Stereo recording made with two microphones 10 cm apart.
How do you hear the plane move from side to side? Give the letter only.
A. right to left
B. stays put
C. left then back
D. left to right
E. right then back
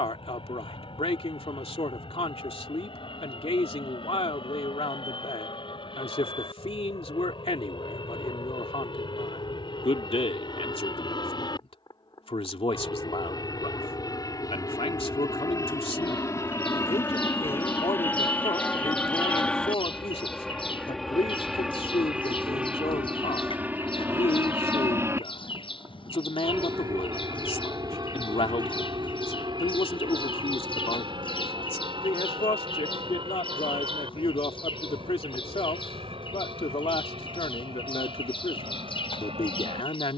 D.